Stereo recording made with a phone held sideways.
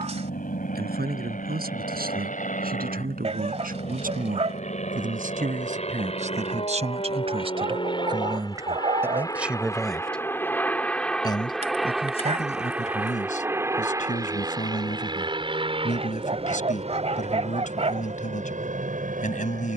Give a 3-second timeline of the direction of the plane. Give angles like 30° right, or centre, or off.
60° left, 50° left, 30° left, 10° left, 10° right, 30° right, 50° right.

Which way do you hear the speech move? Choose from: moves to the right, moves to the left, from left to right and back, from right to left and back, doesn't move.
moves to the left.